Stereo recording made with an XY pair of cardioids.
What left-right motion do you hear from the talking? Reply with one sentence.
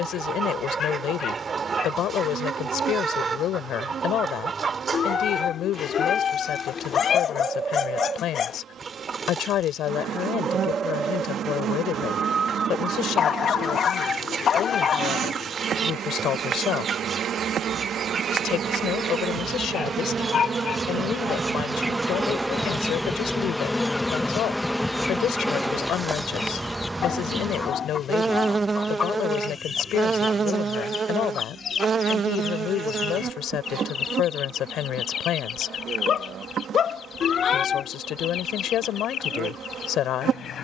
You can hear the talking stay in one place.